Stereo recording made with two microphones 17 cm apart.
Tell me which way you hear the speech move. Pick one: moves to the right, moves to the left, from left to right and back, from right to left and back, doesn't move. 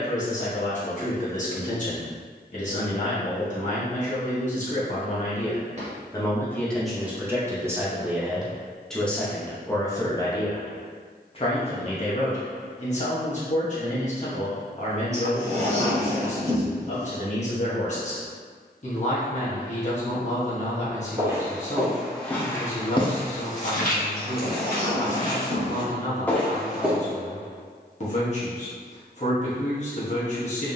from left to right and back.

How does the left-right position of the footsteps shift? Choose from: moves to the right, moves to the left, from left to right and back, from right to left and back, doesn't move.
from right to left and back.